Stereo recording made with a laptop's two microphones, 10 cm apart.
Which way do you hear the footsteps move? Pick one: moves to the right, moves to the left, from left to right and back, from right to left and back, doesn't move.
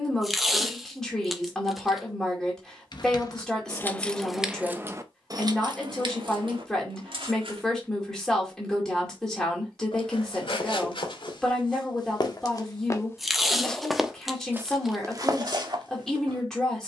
moves to the right.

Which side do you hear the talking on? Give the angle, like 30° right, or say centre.
10° left.